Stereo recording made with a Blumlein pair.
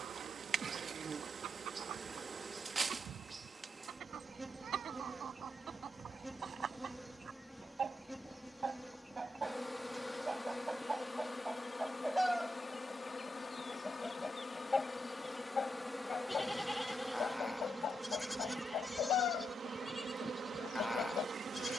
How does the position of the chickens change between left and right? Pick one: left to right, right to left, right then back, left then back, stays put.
right to left.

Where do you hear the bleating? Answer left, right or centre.
centre.